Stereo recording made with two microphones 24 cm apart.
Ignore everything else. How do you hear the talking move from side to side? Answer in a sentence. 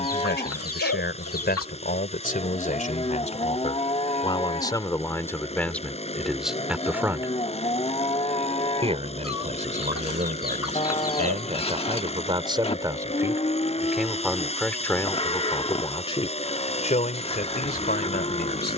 In this clip you hear the talking go right and come back.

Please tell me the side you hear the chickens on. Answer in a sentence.
You can hear the chickens on the left.